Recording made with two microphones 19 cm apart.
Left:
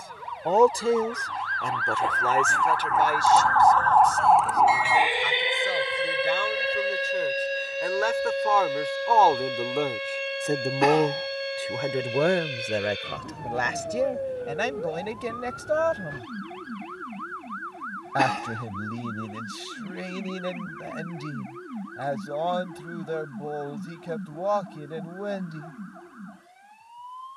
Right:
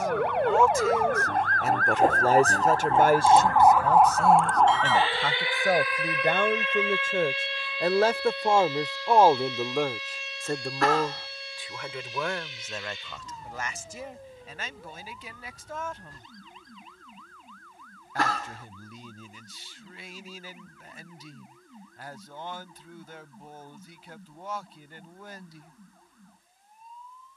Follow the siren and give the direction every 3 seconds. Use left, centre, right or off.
right, centre, left, left, left, left, left, left, left.